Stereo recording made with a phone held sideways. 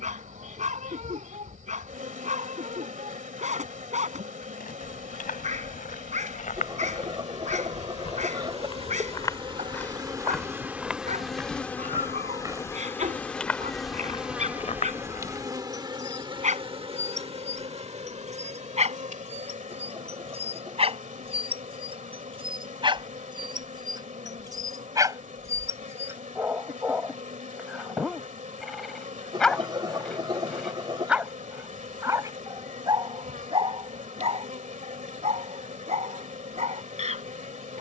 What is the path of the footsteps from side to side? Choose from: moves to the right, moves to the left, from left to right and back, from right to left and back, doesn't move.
from left to right and back.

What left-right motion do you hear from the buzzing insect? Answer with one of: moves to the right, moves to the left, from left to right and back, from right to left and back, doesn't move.
from right to left and back.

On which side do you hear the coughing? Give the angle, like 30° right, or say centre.
30° right.